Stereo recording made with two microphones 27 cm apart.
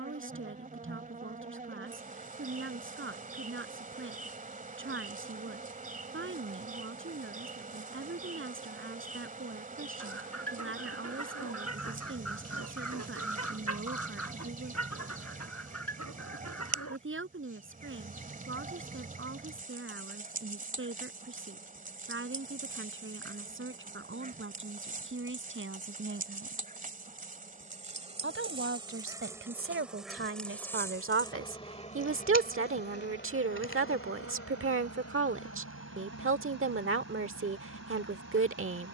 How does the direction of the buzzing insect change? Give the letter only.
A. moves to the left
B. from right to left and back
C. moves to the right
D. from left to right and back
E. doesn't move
A.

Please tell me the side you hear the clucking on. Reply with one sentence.
You can hear the clucking on the left.